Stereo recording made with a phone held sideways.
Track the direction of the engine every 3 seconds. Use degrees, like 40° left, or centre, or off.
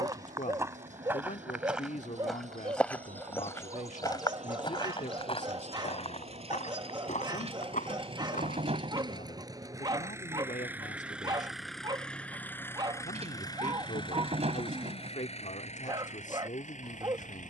60° right, 50° right, 40° right, 10° right, 30° left, 60° left.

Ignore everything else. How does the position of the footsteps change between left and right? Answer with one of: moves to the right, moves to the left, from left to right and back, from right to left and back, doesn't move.
moves to the left.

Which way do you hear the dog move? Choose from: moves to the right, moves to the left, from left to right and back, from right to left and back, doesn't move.
doesn't move.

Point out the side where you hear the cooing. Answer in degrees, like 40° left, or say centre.
50° right.